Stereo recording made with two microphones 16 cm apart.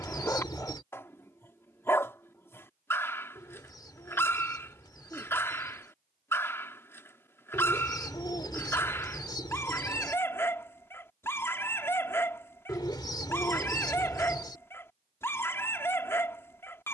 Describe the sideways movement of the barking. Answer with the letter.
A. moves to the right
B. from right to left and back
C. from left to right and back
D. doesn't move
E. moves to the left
D.